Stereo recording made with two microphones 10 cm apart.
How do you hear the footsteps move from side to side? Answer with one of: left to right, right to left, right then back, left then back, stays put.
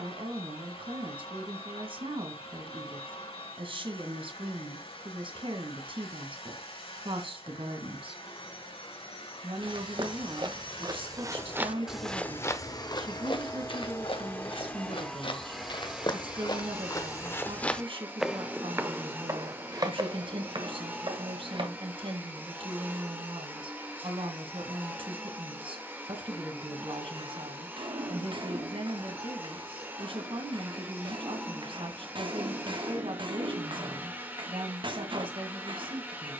left then back.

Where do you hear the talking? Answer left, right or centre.
right.